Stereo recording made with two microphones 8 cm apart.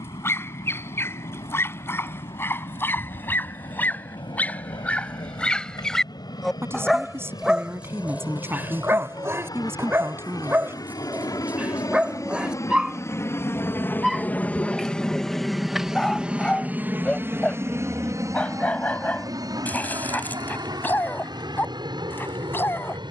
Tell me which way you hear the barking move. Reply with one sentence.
In this clip you hear the barking go right and come back.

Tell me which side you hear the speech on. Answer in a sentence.
In this clip you hear the speech on the right.